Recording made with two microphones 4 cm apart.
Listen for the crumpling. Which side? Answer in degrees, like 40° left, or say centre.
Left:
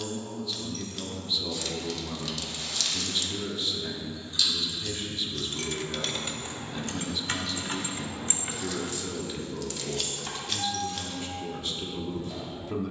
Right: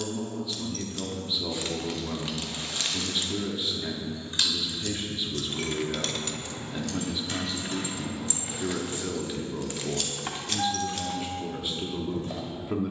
30° right.